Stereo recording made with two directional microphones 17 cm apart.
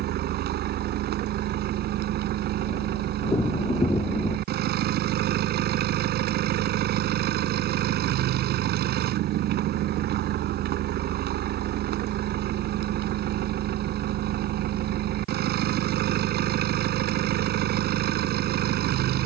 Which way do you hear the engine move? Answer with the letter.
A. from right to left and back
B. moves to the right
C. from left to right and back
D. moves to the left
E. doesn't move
E.